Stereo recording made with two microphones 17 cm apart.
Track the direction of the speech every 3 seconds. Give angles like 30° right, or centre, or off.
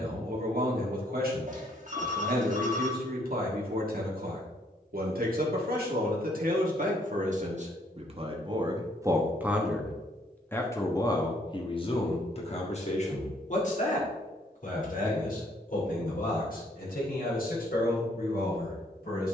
60° right, 60° right, 50° right, 10° left, 50° left, 60° left, 60° left.